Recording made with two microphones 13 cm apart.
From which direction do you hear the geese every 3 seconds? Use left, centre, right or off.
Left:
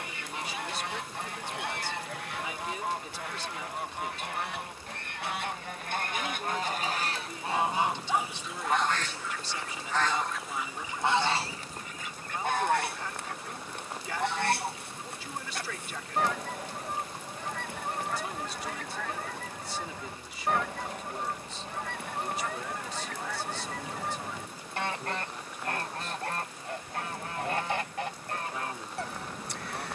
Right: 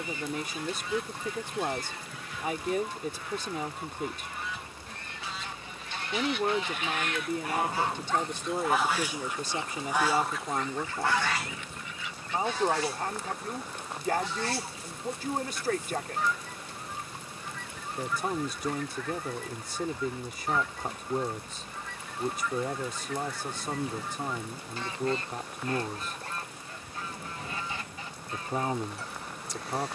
left, left, left, centre, left, left, left, left, left, left.